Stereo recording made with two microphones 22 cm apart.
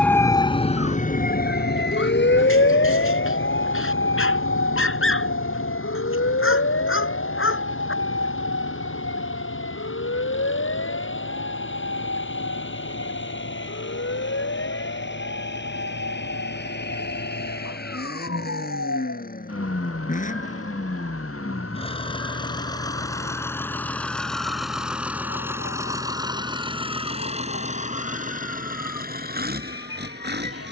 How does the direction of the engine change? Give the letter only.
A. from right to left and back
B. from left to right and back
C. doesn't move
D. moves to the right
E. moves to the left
D.